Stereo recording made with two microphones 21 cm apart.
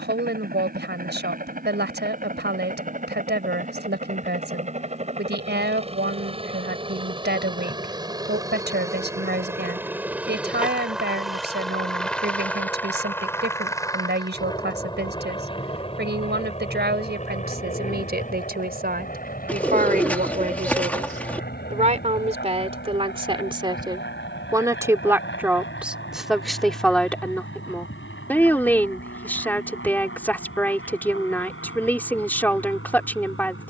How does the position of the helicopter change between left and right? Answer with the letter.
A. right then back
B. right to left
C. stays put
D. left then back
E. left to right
B.